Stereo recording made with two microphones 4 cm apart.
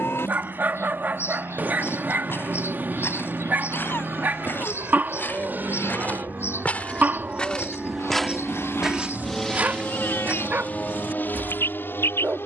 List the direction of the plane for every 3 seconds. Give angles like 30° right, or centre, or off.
70° right, 60° right, 30° right, 30° left.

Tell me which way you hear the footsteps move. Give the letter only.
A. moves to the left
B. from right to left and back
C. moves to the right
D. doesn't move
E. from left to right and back
C.